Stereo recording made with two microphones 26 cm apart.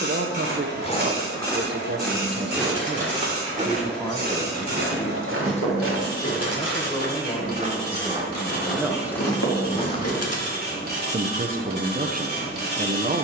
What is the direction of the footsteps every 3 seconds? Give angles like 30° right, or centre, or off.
10° left, 40° right, 30° right, 20° left, off.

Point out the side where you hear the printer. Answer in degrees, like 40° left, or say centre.
40° right.